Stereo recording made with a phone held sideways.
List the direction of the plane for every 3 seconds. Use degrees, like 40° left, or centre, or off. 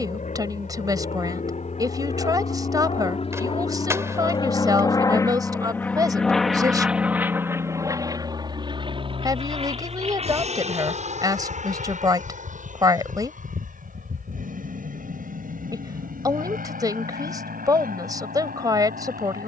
60° left, 30° left, 10° right, 50° right, 60° right, 70° right, 70° right.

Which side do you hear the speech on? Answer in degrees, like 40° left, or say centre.
30° right.